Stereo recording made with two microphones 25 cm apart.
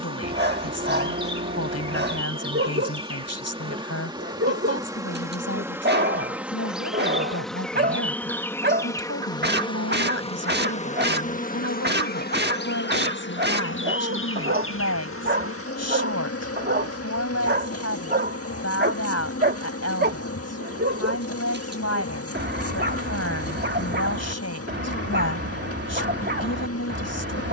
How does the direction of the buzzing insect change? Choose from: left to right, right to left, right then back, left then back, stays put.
right to left.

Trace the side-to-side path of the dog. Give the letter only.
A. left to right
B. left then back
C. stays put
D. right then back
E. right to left
C.